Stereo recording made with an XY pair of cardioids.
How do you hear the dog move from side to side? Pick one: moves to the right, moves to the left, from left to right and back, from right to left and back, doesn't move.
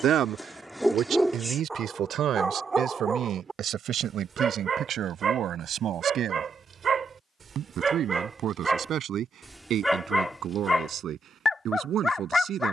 from left to right and back.